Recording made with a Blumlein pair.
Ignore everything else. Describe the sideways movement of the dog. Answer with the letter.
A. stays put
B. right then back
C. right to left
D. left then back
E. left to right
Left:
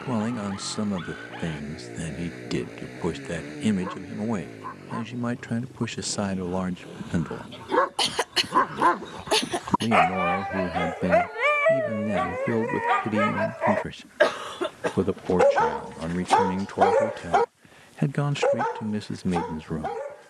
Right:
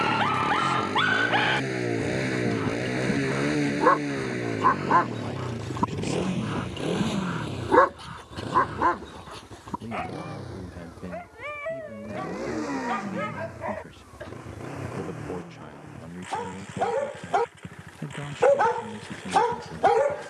D.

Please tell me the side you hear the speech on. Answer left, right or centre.
left.